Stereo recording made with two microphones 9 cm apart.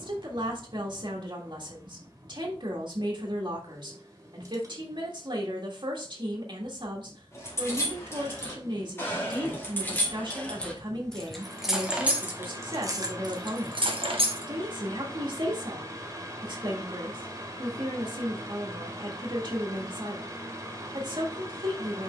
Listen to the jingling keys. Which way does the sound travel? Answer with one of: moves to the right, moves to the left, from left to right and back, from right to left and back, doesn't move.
moves to the right.